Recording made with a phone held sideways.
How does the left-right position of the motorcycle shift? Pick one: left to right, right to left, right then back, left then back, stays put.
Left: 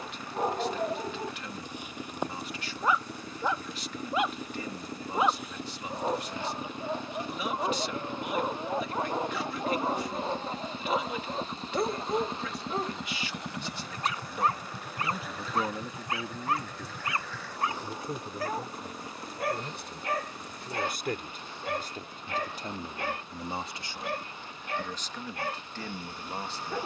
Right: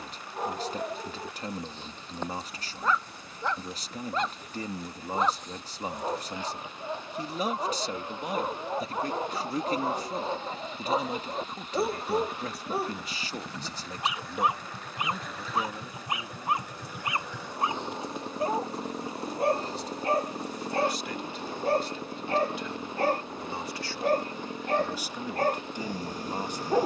left to right.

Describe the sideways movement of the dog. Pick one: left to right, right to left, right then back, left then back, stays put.
left to right.